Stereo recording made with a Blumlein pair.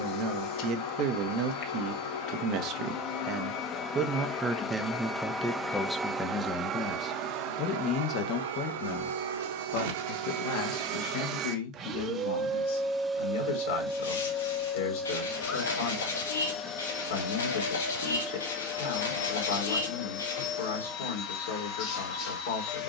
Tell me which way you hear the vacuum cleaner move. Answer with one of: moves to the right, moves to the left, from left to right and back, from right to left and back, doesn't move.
from left to right and back.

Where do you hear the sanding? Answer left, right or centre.
left.